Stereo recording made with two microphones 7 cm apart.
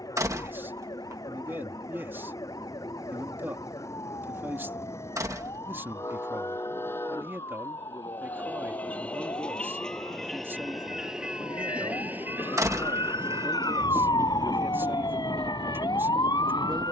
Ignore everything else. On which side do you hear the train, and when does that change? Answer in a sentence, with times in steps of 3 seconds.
You can hear the train on the left from 0 s, in the centre from 9 s and on the right from 12 s.